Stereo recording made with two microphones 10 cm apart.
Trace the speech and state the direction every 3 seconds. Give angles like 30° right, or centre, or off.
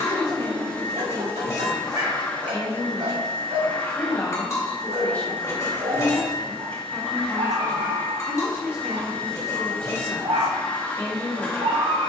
30° left, 20° left, centre, 20° left.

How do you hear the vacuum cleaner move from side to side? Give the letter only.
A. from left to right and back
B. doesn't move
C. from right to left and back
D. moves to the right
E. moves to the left
B.